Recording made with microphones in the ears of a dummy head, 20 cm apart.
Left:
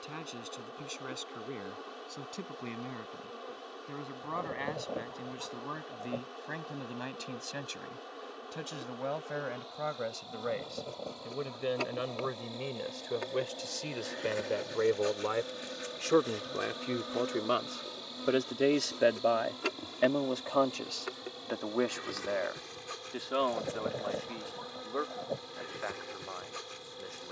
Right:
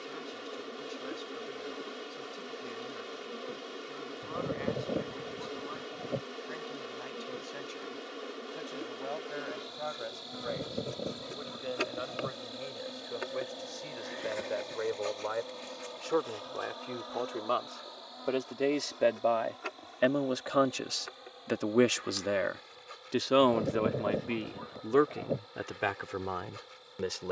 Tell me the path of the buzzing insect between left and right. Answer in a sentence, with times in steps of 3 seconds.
You can hear the buzzing insect on the right from 0 s, in the centre from 12 s and on the left from 15 s.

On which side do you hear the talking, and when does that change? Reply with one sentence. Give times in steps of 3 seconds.
In this clip you hear the talking on the left from 0 s, in the centre from 18 s and on the right from 21 s.